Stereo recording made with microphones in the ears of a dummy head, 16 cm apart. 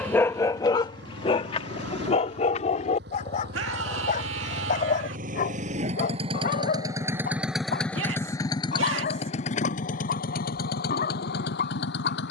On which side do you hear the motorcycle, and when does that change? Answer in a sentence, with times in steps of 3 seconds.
In this clip you hear the motorcycle on the right from 0 s, in the centre from 6 s and on the left from 9 s.